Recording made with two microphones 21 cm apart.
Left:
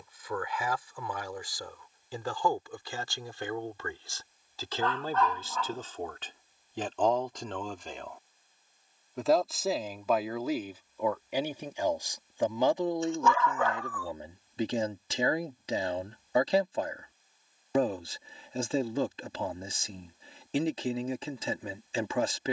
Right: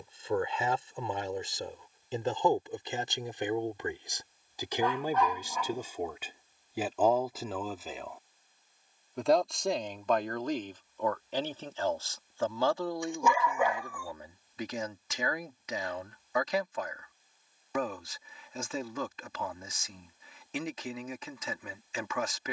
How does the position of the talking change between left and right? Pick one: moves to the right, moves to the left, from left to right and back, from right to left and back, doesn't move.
moves to the left.